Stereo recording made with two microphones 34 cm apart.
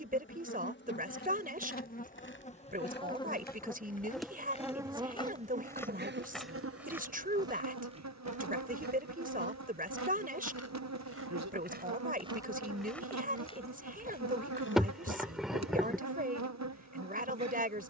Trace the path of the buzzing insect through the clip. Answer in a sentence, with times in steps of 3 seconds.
In this clip you hear the buzzing insect on the left from 0 s, in the centre from 3 s and on the right from 6 s.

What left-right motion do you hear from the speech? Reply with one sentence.
You can hear the speech stay put.